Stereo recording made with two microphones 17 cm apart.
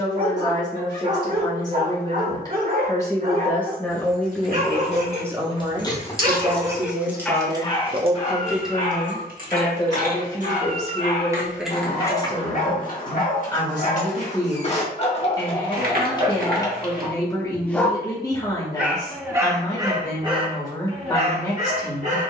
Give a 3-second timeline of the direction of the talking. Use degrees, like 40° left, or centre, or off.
20° left, centre, 30° right, 20° left, 20° left, 20° left, 20° left, 20° left.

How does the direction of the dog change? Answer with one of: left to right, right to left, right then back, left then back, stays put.
left then back.